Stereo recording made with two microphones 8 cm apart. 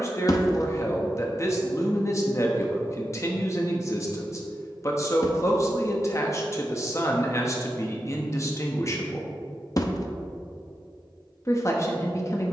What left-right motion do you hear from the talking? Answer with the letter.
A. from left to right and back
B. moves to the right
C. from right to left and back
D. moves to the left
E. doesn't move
E.